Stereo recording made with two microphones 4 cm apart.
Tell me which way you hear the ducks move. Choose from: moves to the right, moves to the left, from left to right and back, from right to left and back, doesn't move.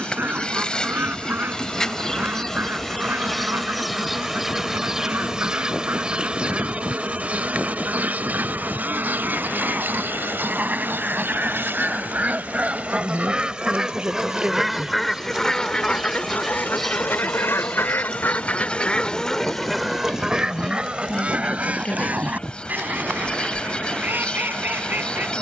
from right to left and back.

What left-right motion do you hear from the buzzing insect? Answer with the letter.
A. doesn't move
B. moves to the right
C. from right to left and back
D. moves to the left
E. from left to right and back
E.